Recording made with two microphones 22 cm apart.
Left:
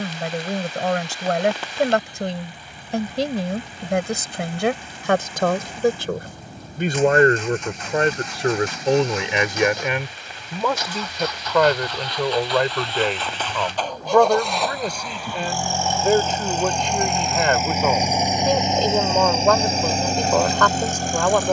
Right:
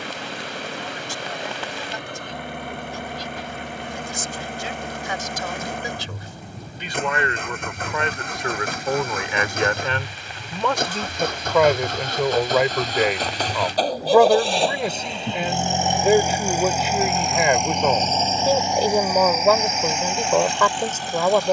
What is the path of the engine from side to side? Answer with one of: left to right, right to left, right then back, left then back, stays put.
right to left.